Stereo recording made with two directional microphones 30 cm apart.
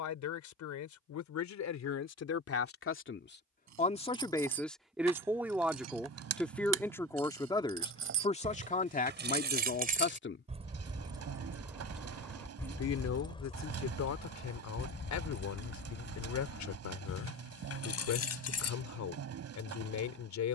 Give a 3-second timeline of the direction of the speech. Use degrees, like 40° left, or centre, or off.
60° left, 10° left, 10° left, 30° left, 60° left, 60° left, 60° left.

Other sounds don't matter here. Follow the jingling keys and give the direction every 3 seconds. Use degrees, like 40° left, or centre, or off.
off, 60° right, 50° right, 20° right, 20° left, 40° left, 50° left.